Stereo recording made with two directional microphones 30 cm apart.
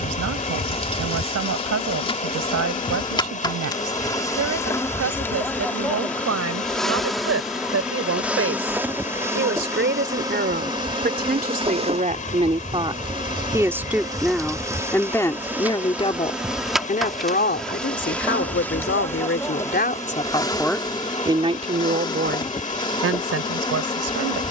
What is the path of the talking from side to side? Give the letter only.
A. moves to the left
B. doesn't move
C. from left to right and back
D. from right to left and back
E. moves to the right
D.